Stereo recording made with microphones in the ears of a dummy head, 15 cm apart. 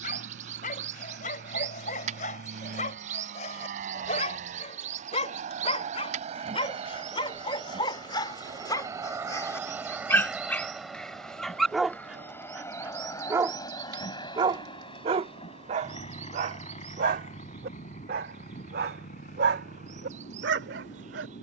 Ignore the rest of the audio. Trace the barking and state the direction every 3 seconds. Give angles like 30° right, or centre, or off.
50° left, 40° left, 30° left, 10° left, 20° right, 40° right, 60° right.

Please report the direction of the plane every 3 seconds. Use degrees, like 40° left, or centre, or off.
70° right, 50° right, 30° right, centre, 20° left, 40° left, 50° left.